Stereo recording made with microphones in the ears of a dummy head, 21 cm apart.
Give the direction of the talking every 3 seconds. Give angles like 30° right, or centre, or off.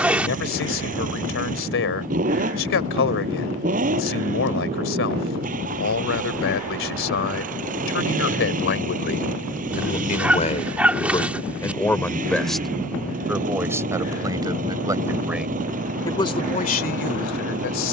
60° left, 60° left, 60° left, 30° left, 10° right, 30° left.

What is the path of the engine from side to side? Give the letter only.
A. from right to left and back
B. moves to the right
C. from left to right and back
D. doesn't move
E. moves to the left
D.